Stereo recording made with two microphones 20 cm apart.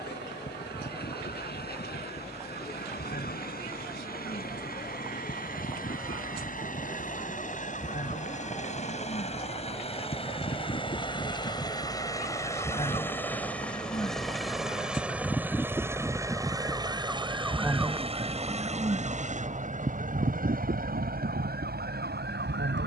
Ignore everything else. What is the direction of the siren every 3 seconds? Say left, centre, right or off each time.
left, left, left, left, left, centre, right, right.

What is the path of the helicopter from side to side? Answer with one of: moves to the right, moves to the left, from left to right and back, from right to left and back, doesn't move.
moves to the right.